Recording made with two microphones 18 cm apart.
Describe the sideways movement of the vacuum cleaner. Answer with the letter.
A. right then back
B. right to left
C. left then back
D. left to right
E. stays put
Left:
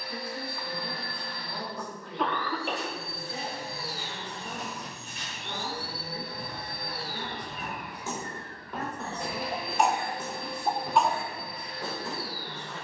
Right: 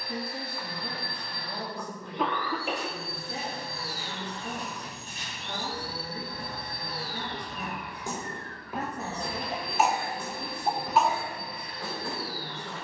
C.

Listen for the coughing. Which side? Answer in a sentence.
You can hear the coughing in the centre.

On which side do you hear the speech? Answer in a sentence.
You can hear the speech on the right.